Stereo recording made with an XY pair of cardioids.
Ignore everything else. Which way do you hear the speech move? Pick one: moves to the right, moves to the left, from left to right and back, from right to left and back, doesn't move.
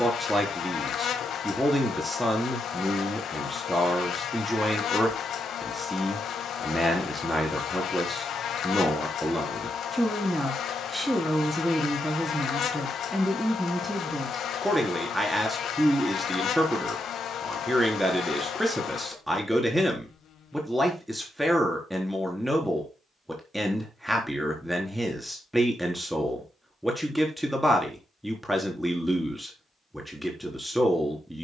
doesn't move.